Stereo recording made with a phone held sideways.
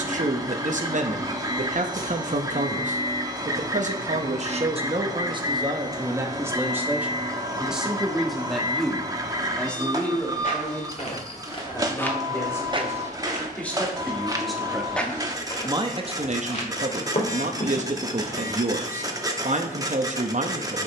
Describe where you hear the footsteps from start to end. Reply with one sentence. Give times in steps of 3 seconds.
In this clip you hear the footsteps not at all from 0 s, on the left from 9 s, on the right from 12 s and on the left from 15 s.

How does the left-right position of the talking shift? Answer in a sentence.
In this clip you hear the talking move from right to left and back again.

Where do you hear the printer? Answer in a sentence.
In this clip you hear the printer on the right.